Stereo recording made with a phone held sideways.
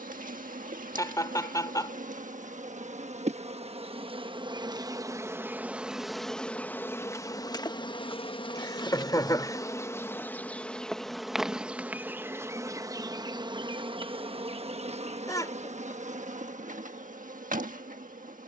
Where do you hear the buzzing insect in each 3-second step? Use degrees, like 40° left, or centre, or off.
60° right, 30° right, 20° left, 10° left, 30° right, 50° right.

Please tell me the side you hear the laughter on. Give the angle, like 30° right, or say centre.
20° left.